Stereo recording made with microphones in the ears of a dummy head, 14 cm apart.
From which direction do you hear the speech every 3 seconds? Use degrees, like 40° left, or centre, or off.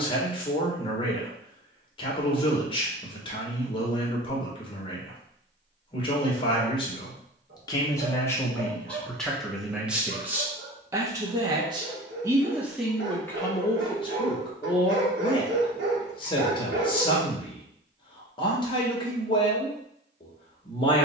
40° left, 40° left, 30° left, 10° right, 20° left, 40° left, 40° left.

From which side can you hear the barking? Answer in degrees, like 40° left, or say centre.
80° right.